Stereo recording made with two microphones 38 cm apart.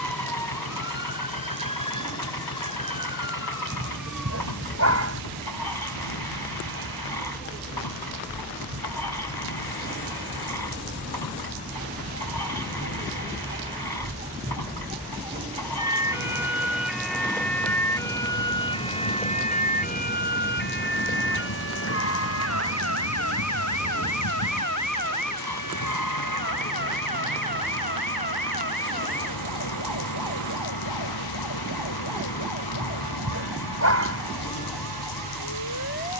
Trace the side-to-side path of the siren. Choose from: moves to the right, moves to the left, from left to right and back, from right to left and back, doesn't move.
moves to the left.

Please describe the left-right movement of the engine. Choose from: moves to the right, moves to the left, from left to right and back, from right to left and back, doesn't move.
doesn't move.